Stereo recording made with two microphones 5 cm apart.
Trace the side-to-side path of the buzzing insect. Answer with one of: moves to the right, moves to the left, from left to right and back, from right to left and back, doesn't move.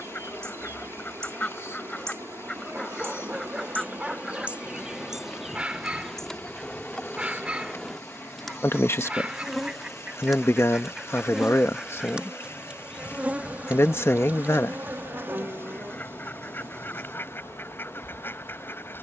from right to left and back.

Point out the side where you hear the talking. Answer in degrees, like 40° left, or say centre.
60° left.